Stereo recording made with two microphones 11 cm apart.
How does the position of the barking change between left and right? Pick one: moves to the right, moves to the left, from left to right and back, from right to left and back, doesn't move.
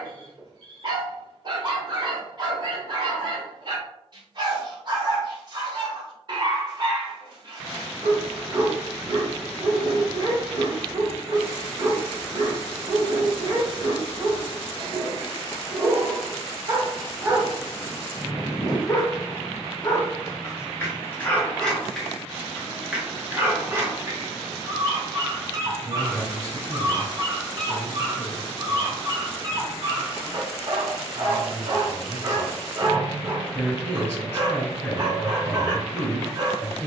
from right to left and back.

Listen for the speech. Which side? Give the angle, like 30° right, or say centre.
20° left.